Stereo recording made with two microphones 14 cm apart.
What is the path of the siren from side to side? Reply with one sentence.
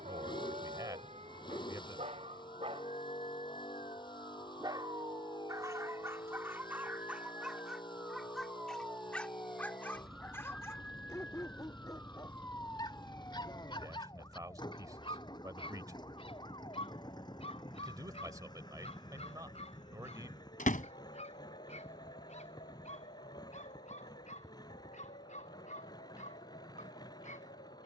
In this clip you hear the siren move to the left.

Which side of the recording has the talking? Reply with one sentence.
You can hear the talking on the right.